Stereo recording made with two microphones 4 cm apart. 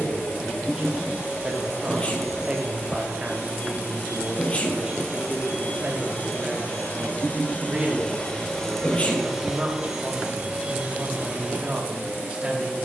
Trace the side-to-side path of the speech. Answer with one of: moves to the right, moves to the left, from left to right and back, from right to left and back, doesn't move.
doesn't move.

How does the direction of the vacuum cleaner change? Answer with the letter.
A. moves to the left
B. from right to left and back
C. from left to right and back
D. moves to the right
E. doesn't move
D.